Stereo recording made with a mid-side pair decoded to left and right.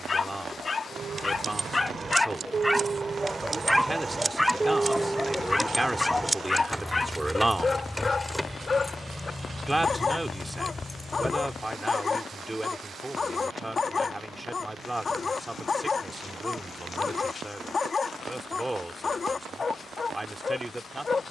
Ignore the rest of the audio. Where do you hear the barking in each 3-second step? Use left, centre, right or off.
left, centre, left, left, left, left, left.